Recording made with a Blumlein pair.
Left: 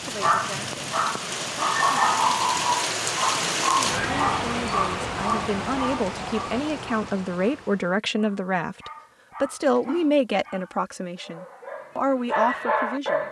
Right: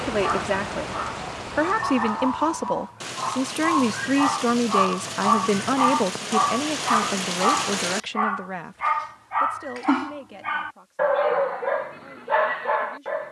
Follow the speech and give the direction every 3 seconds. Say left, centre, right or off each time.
right, right, centre, left, left.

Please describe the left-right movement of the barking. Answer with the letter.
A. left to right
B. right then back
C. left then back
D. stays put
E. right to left
B.